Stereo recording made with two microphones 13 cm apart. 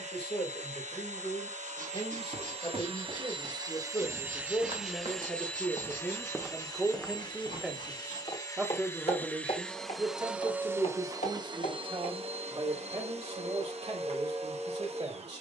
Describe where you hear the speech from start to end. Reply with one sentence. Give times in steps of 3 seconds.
You can hear the speech on the left from 0 s, in the centre from 6 s and on the right from 9 s.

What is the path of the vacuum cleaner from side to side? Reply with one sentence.
In this clip you hear the vacuum cleaner go left and come back.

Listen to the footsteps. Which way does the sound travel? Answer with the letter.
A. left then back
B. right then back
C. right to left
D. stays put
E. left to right
C.